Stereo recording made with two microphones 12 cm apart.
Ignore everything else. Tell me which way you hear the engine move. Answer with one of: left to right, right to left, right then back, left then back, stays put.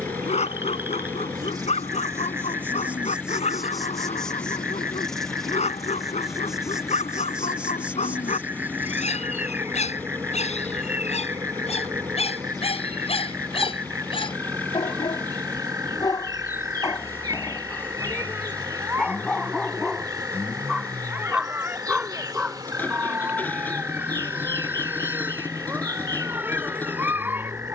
stays put.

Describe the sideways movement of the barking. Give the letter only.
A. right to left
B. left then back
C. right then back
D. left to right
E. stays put
D.